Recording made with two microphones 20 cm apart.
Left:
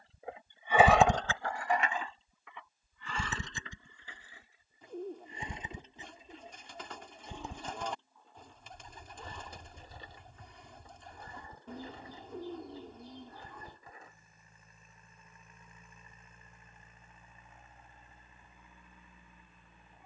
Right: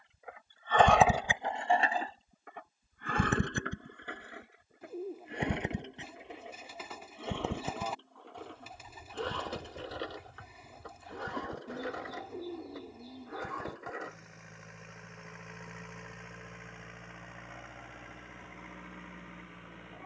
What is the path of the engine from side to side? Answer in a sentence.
In this clip you hear the engine travel towards the right.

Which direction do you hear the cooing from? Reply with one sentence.
You can hear the cooing in the centre.